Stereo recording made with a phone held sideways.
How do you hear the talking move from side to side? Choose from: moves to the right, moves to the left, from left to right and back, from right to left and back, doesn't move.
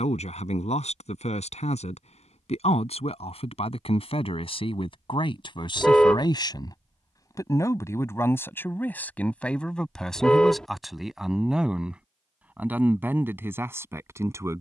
moves to the right.